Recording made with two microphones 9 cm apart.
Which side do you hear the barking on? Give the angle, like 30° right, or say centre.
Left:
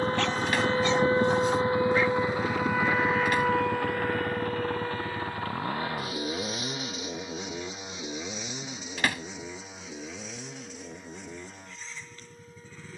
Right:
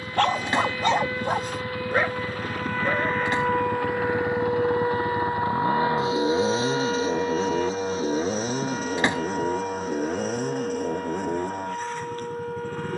50° right.